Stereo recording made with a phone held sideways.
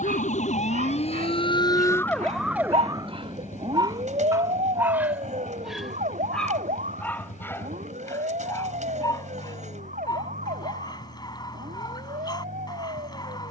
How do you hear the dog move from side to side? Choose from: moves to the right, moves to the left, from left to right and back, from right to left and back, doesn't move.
moves to the left.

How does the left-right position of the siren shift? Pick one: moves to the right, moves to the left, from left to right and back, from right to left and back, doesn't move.
moves to the right.